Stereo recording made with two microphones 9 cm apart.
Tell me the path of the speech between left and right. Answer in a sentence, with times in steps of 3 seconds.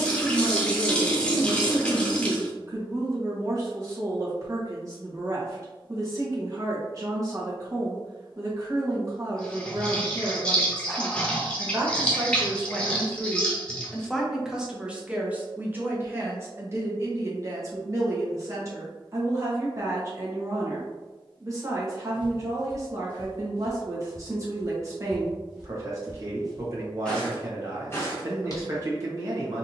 You can hear the speech on the right from 0 s, in the centre from 12 s and on the right from 15 s.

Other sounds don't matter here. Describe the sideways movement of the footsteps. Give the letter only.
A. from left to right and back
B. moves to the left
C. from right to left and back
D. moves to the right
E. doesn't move
A.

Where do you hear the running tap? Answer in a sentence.
You can hear the running tap in the centre.